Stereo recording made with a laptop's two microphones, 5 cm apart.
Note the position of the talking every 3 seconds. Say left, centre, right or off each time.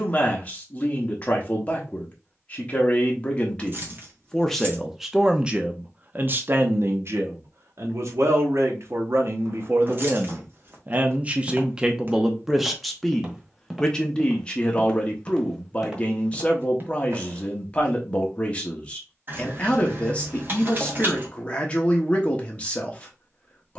left, centre, right, right, centre, left, left, left.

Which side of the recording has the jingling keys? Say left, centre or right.
right.